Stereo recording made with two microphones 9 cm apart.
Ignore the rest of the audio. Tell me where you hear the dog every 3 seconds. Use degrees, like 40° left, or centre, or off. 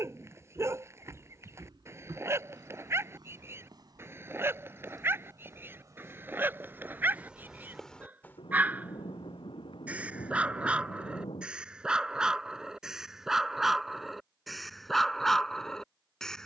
30° right, 30° right, 20° right, 10° right, centre, centre.